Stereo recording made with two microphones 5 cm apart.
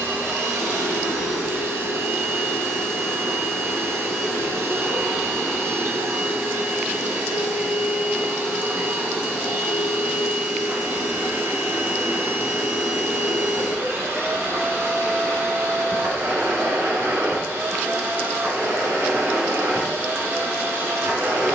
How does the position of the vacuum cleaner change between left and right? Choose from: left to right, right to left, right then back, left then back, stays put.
stays put.